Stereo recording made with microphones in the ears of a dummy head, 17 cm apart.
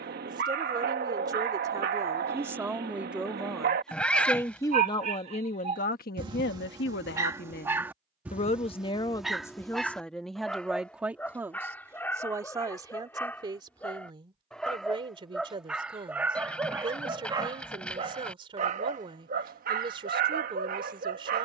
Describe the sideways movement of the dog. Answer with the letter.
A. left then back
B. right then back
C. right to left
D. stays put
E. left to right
A.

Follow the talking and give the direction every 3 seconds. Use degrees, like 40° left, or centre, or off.
20° right, 20° left, 50° left, centre, 20° right, 30° right, 30° right.